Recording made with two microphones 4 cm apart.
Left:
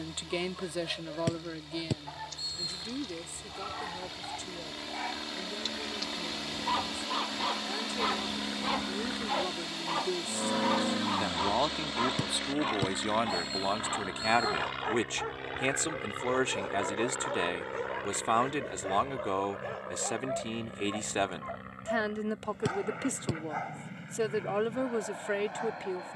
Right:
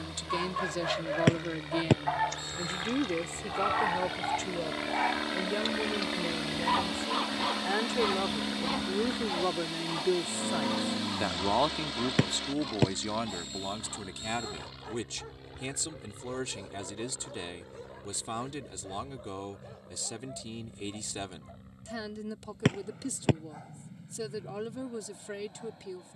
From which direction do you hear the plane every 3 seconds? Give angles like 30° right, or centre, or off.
60° right, 40° right, 20° right, 20° left, 40° left, 60° left, 70° left, 70° left, 80° left.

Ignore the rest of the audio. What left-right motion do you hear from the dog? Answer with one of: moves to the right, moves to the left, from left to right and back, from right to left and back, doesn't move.
moves to the left.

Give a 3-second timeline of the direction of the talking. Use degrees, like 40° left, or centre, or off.
10° right, 50° right, 50° right, 20° right, 30° left, 50° left, 50° left, 50° left, 50° left.